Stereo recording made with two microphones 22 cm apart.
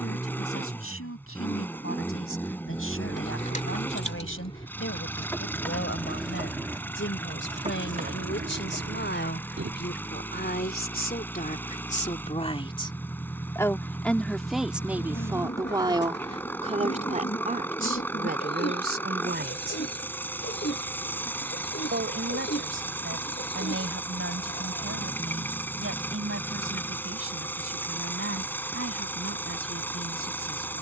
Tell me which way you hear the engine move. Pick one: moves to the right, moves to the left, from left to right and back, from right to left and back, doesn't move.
doesn't move.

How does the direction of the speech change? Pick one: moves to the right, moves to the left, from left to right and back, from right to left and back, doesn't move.
moves to the right.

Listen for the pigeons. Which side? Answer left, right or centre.
left.